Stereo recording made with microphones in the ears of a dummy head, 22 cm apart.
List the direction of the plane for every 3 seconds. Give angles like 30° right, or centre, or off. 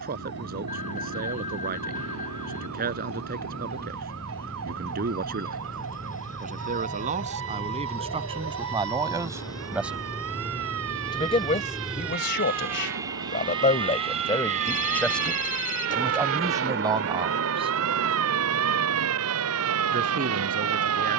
50° left, 40° left, 30° left, 10° left, 20° right, 40° right, 60° right.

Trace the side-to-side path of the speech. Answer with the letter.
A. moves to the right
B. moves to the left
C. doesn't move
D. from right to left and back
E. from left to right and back
D.